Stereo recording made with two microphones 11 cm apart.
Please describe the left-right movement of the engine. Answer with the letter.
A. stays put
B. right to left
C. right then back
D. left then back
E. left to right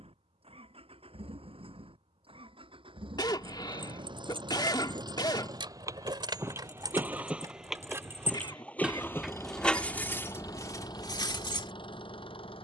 B.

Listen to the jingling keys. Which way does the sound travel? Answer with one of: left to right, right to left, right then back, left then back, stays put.
right to left.